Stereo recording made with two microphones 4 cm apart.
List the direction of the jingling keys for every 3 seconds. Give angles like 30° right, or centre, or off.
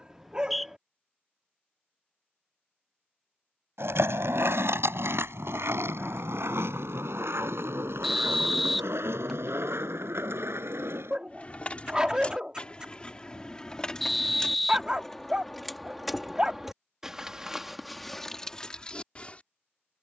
off, off, off, 30° left, 20° left, 10° right, 20° left.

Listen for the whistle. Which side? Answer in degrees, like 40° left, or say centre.
centre.